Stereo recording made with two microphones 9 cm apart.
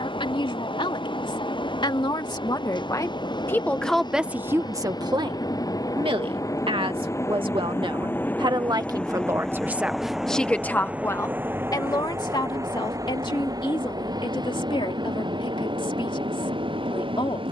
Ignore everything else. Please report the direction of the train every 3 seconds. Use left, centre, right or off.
left, left, left, centre, right, right.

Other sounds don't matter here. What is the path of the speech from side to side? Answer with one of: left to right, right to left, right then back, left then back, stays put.
right then back.